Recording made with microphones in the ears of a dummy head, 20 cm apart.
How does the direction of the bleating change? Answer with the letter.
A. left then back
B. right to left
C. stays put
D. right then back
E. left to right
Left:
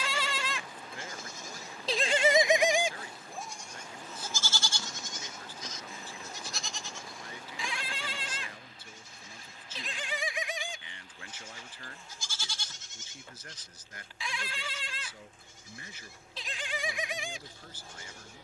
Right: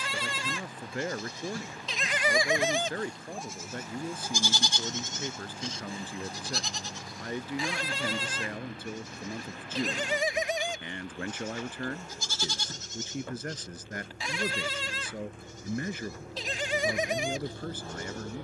E.